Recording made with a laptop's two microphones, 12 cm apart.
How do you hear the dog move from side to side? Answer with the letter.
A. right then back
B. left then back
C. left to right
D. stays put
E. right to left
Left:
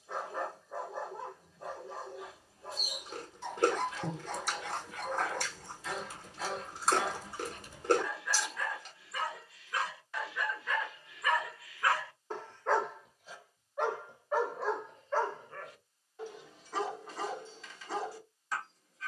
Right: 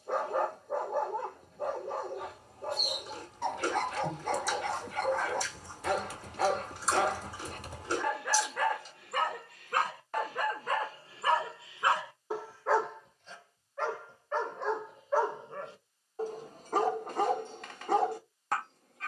B.